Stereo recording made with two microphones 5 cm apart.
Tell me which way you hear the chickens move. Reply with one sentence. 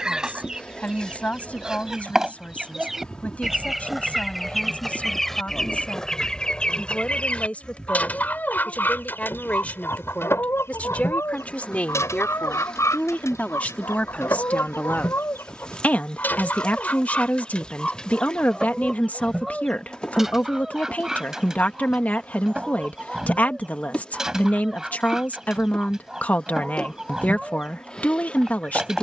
You can hear the chickens go left and come back.